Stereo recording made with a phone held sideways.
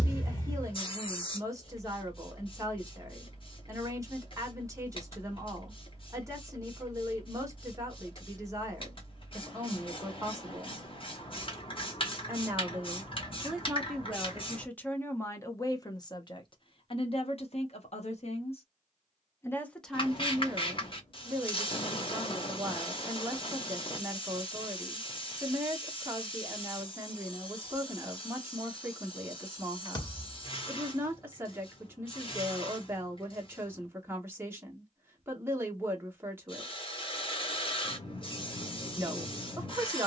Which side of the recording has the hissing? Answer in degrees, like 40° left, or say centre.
40° left.